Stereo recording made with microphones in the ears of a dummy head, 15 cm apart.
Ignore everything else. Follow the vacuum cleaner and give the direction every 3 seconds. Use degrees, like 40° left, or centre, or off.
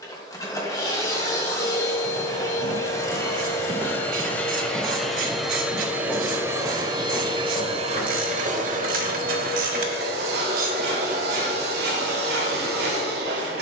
20° left, 10° left, 30° right, 60° right, 70° right.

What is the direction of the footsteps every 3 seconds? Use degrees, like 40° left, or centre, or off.
50° right, 20° right, 20° left, off, off.